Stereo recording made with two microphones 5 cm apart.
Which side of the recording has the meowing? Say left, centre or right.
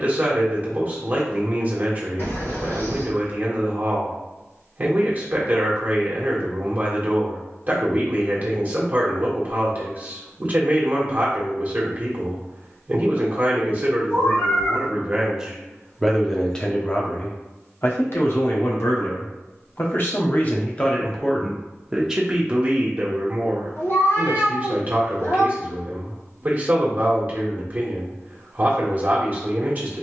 left.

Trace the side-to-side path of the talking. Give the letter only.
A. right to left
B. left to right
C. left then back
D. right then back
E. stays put
C.